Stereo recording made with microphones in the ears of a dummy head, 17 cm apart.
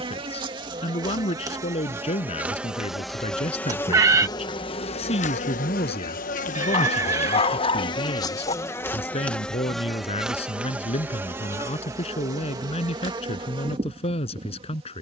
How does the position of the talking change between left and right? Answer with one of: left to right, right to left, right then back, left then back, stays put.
stays put.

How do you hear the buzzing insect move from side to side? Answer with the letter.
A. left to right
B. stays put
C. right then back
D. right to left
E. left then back
E.